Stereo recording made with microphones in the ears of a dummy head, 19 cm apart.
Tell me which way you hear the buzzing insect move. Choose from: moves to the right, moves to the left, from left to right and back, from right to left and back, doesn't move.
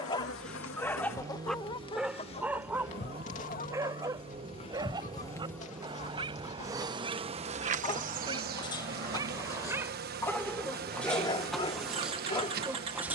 moves to the right.